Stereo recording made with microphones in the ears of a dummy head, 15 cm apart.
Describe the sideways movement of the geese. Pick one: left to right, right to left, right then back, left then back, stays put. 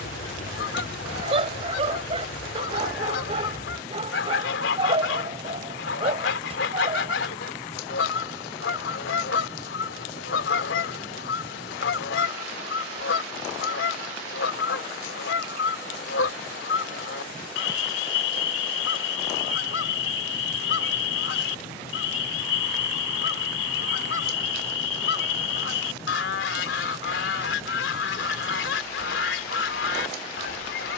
stays put.